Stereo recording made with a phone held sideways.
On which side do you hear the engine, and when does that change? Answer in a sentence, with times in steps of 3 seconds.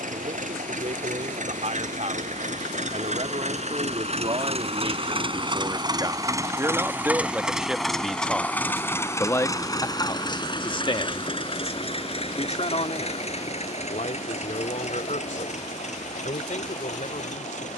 You can hear the engine on the right from 0 s, in the centre from 6 s and on the left from 9 s.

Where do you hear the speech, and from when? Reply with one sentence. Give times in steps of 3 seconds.
In this clip you hear the speech on the right from 0 s, in the centre from 6 s and on the left from 9 s.